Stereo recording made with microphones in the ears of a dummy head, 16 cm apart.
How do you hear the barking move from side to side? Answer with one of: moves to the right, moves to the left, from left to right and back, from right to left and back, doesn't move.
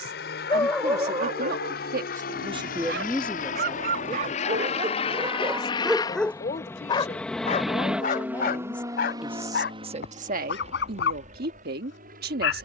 from left to right and back.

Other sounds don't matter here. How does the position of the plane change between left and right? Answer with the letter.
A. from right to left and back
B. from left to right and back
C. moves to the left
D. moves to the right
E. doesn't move
D.